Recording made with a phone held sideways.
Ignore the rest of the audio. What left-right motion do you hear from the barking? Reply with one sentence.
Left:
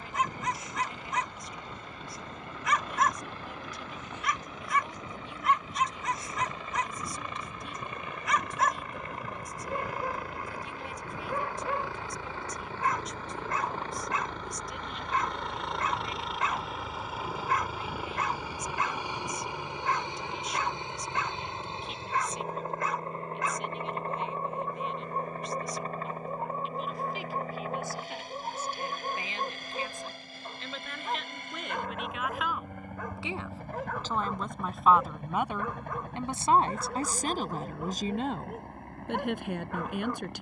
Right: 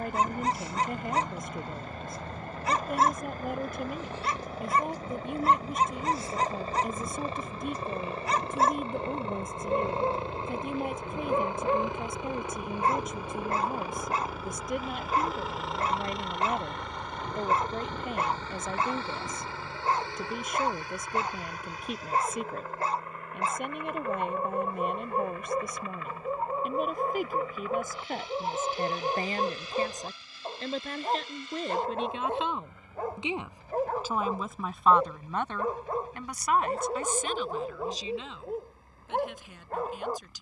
In this clip you hear the barking stay in one place.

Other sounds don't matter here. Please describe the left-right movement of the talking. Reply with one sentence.
In this clip you hear the talking move from right to left.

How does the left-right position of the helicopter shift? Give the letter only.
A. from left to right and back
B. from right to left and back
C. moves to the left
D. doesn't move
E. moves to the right
C.